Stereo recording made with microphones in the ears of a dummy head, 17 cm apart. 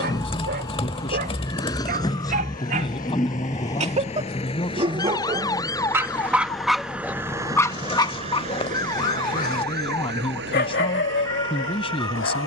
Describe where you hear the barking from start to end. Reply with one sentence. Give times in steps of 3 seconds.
You can hear the barking on the right from 0 s, in the centre from 6 s and on the left from 9 s.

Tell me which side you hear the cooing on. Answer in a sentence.
You can hear the cooing on the left.